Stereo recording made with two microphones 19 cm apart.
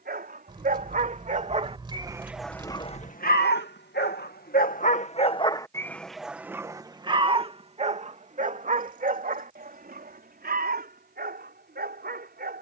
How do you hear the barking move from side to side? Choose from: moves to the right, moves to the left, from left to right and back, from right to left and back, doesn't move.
from right to left and back.